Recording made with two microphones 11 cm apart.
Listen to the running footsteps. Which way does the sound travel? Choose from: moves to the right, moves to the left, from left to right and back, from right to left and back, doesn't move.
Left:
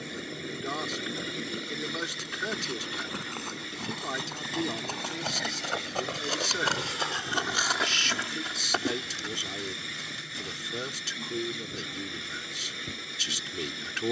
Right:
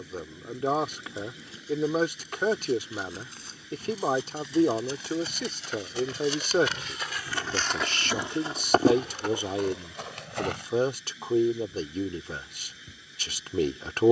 moves to the right.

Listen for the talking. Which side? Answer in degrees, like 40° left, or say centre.
50° right.